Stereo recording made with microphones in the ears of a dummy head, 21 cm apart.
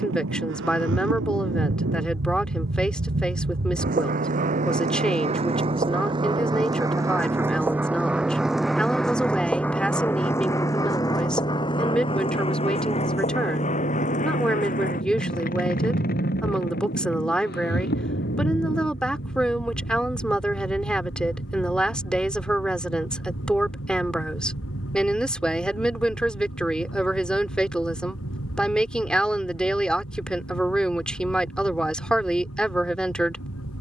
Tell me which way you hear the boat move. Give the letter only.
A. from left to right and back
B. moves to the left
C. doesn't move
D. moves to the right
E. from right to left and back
B.